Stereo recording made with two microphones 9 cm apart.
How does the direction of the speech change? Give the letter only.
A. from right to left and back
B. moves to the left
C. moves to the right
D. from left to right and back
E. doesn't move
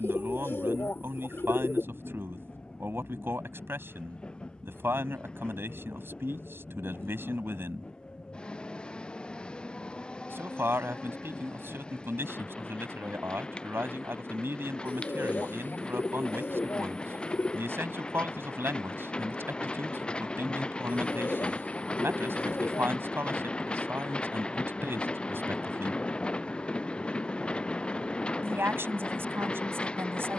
E.